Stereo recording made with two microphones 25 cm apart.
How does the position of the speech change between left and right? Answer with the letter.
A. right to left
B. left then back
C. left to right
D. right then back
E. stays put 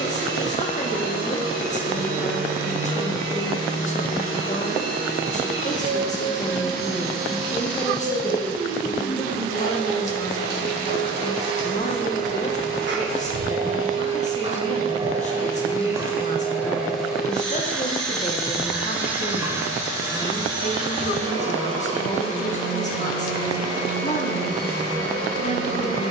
E.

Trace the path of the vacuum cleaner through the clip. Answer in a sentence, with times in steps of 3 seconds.
You can hear the vacuum cleaner on the right from 0 s, in the centre from 15 s and on the right from 21 s.